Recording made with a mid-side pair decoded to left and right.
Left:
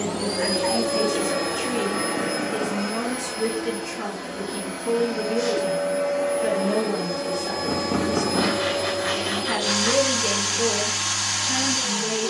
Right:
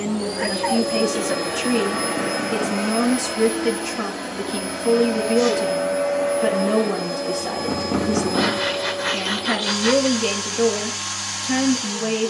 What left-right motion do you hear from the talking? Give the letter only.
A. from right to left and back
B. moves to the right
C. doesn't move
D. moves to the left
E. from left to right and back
C.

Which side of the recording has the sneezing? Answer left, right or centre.
right.